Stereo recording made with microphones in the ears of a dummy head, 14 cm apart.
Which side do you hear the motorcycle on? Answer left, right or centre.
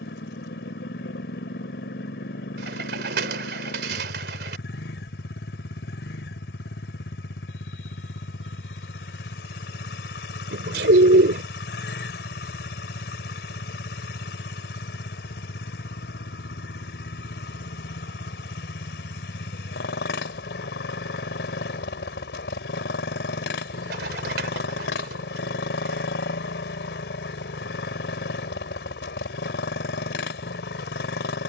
left.